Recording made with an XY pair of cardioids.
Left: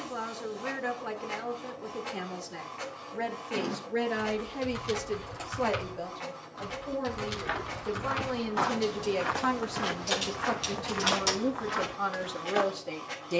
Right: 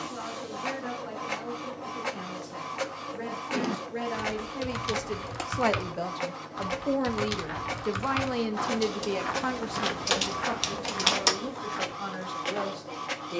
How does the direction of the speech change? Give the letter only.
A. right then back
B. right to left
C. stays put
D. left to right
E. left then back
A.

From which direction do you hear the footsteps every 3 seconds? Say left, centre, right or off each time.
off, off, left, centre, left.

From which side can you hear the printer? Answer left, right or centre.
right.